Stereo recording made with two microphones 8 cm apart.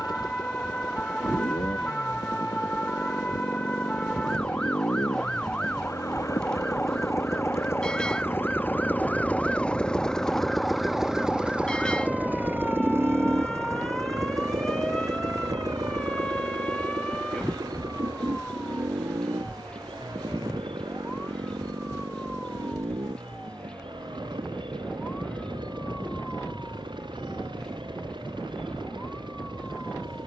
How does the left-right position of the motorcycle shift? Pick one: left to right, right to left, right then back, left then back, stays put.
left to right.